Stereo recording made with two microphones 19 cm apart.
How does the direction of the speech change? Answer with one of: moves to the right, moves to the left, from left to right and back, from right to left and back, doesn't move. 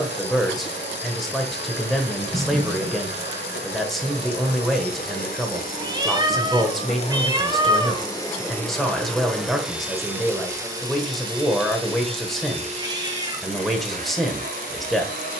doesn't move.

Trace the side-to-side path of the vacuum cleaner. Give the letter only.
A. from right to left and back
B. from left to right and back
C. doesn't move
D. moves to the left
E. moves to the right
E.